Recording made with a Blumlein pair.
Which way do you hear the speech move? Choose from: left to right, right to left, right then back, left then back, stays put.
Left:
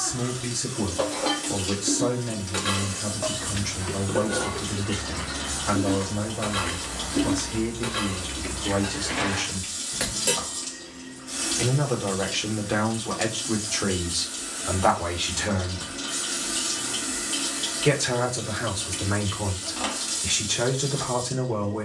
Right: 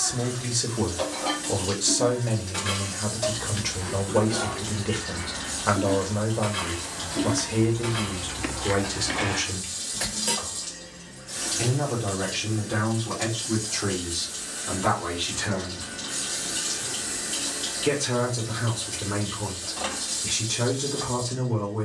right to left.